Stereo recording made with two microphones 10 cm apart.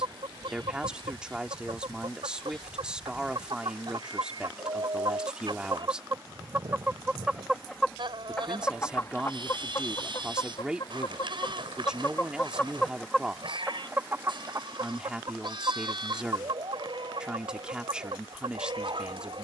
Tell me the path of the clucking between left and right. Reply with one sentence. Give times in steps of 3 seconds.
In this clip you hear the clucking on the right from 0 s, in the centre from 6 s, on the left from 9 s, in the centre from 12 s and on the right from 15 s.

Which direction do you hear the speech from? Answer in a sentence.
In this clip you hear the speech in the centre.